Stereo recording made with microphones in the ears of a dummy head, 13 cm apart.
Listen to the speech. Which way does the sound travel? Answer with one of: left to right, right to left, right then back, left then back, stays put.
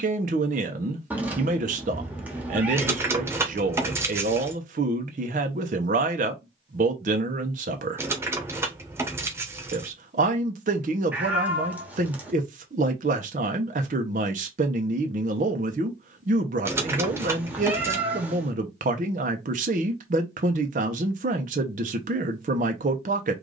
stays put.